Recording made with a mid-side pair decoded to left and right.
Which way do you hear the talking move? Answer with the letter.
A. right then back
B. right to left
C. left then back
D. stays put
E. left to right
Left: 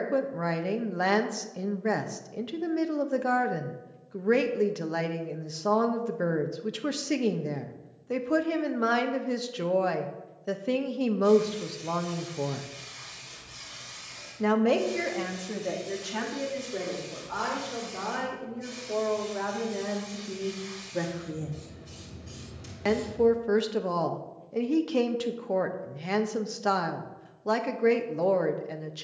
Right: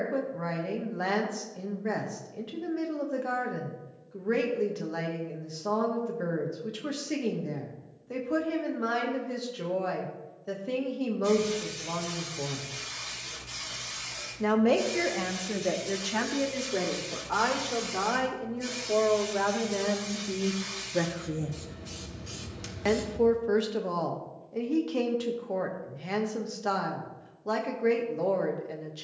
A.